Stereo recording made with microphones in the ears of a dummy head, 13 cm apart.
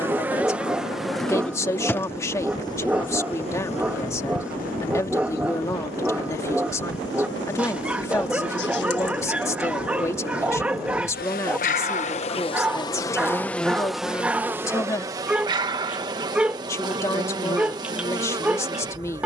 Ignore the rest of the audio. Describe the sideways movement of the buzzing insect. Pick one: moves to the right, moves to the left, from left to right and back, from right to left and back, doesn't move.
from right to left and back.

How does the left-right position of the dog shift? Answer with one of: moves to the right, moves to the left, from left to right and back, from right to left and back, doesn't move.
doesn't move.